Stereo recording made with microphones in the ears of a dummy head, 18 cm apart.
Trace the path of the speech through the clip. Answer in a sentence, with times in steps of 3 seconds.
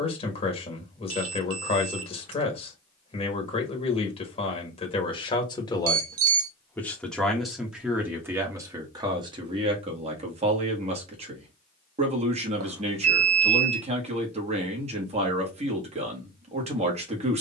You can hear the speech on the left from 0 s, in the centre from 6 s and on the right from 9 s.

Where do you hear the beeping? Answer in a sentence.
In this clip you hear the beeping on the right.